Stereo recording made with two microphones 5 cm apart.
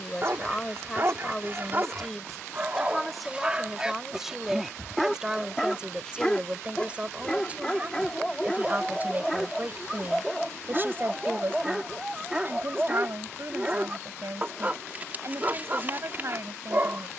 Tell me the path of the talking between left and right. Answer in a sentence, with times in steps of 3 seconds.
You can hear the talking in the centre from 0 s and on the right from 6 s.